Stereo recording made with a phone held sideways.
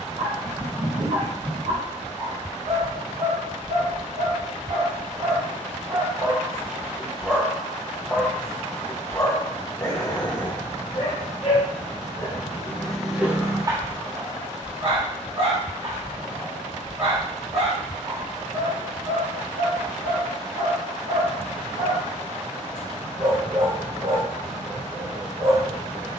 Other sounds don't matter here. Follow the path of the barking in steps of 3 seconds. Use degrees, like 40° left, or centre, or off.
60° right, 50° right, 10° right, 40° left, 10° right, 50° right, 50° right, 50° right, 50° right.